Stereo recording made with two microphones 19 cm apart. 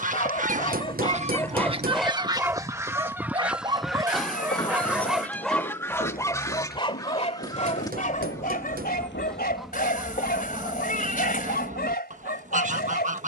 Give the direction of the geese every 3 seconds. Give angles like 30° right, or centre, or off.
30° right, centre, 20° left, 20° right, 40° right.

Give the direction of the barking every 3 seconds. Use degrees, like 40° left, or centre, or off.
10° left, 10° right, 40° left, 60° left, 60° left.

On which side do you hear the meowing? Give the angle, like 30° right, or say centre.
50° left.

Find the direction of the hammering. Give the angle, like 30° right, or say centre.
50° right.